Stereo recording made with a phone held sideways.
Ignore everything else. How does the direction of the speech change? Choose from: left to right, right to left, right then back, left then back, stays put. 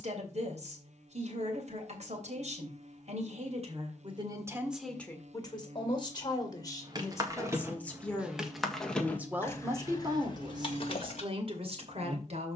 left then back.